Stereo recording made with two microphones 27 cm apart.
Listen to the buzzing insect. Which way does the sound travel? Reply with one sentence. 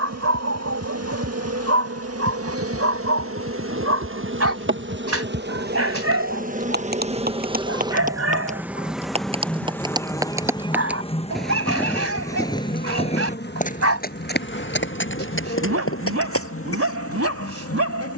In this clip you hear the buzzing insect move to the left.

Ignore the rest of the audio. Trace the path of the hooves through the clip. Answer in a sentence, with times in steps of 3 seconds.
In this clip you hear the hooves on the right from 0 s, in the centre from 9 s and on the left from 12 s.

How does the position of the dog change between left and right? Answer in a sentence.
In this clip you hear the dog stay in one place.